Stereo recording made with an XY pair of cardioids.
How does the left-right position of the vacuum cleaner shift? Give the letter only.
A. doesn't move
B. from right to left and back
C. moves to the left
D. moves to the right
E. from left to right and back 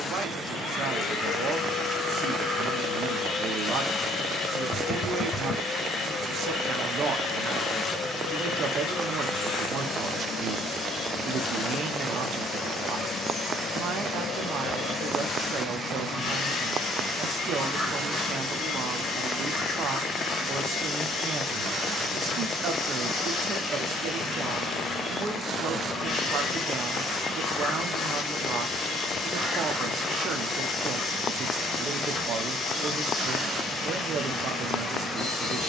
A.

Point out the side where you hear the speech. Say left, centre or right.
right.